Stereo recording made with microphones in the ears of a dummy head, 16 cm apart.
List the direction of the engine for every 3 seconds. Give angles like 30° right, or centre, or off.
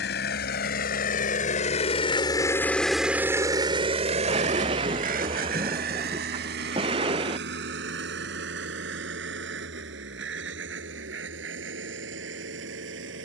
40° left, 40° right, 70° right, 80° right, 80° right.